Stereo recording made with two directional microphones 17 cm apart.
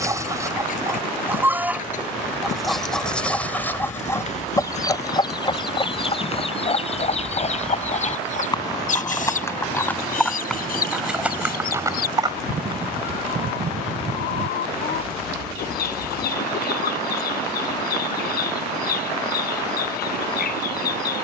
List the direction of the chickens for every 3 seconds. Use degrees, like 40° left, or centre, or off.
10° right, 20° left, 40° left, 50° left, 60° left, 60° left, 60° left.